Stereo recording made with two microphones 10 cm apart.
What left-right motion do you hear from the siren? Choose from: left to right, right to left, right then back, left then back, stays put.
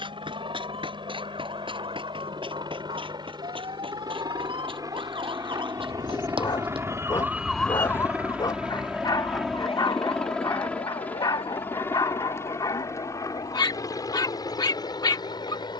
right to left.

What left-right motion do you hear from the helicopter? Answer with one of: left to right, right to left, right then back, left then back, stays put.
right to left.